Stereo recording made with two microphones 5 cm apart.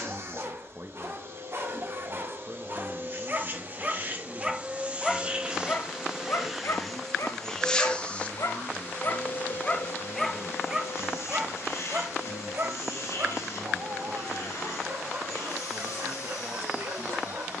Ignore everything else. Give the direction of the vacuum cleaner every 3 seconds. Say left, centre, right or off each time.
right, right, centre, left, left, left.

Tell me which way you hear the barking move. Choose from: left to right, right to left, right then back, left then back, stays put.
left then back.